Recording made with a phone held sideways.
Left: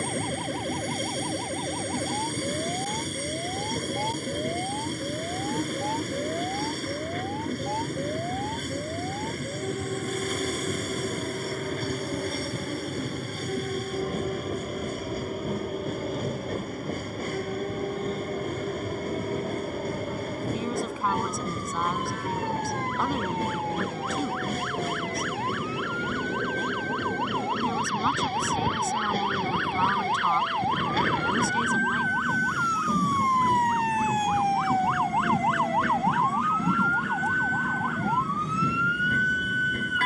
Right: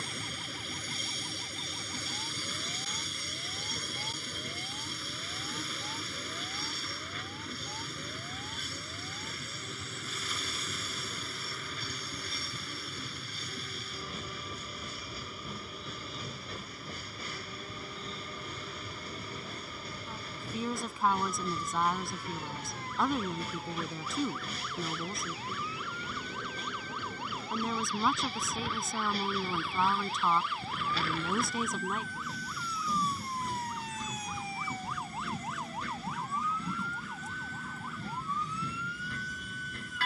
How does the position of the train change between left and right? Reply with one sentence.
You can hear the train stay in one place.